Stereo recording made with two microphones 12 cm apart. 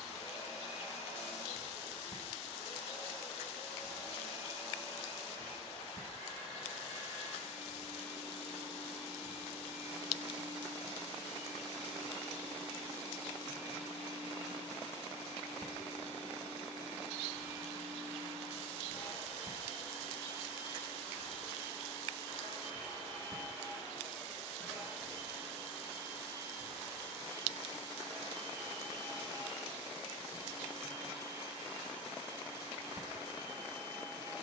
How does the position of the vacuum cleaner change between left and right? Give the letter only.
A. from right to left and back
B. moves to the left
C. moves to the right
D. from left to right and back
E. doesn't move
C.